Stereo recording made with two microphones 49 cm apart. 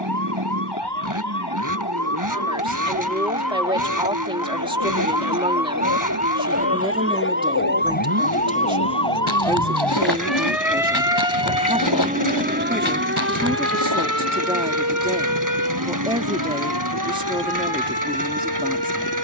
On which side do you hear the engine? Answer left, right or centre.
right.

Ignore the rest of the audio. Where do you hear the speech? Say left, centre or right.
centre.